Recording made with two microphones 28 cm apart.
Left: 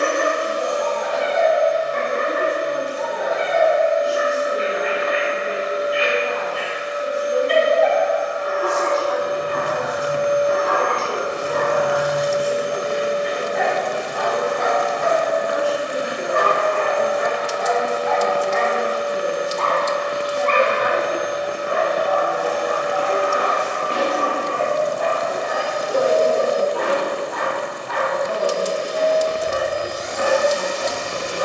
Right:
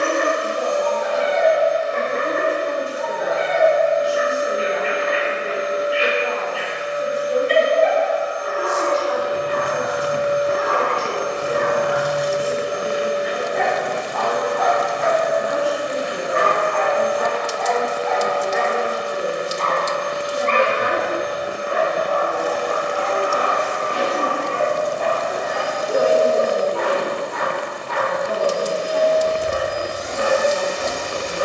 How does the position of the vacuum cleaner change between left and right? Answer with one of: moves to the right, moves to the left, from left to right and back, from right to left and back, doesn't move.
from left to right and back.